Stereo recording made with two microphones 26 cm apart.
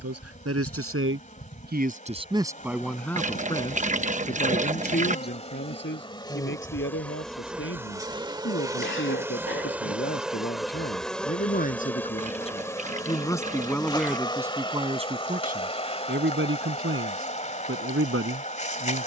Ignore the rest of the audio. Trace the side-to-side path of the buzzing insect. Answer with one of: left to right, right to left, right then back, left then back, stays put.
right then back.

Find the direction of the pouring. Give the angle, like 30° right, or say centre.
30° right.